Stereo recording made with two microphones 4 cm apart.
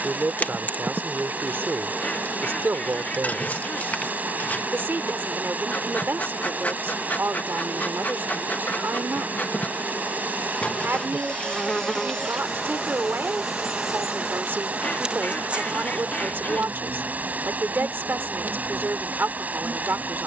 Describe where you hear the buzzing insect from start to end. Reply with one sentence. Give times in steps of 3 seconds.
You can hear the buzzing insect on the left from 0 s, in the centre from 12 s and on the right from 15 s.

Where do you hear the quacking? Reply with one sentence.
You can hear the quacking on the left.